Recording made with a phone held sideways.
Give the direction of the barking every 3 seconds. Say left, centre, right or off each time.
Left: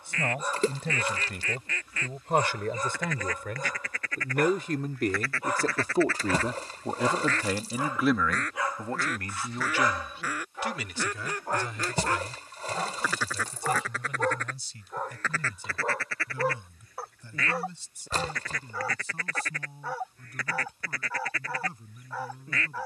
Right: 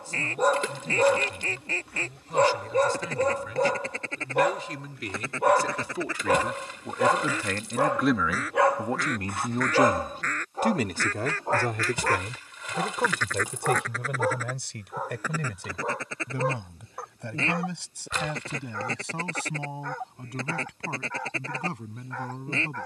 right, right, right, right, centre, centre, centre, centre.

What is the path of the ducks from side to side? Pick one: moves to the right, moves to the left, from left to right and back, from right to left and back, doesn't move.
from right to left and back.